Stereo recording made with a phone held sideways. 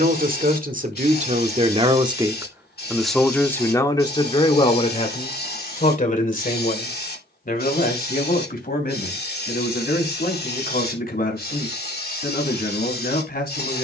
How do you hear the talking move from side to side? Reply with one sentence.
In this clip you hear the talking travel towards the left.